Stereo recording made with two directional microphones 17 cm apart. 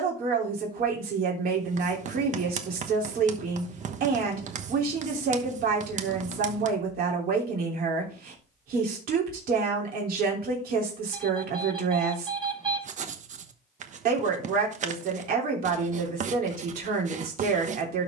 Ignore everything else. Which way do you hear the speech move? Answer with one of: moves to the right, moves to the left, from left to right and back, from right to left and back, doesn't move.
doesn't move.